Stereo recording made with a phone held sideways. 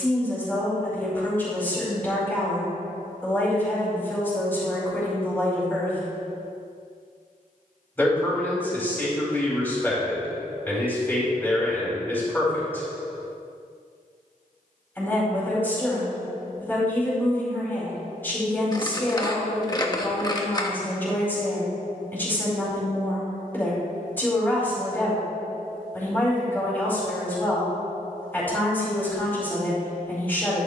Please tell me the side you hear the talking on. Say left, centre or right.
centre.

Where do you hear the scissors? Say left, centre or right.
left.